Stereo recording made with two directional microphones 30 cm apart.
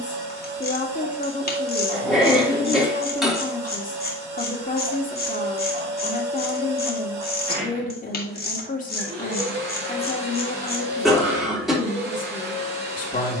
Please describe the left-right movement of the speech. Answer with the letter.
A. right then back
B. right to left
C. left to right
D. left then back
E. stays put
E.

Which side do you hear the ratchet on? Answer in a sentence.
You can hear the ratchet on the left.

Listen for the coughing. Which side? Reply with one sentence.
You can hear the coughing in the centre.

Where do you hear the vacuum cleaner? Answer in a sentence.
In this clip you hear the vacuum cleaner on the right.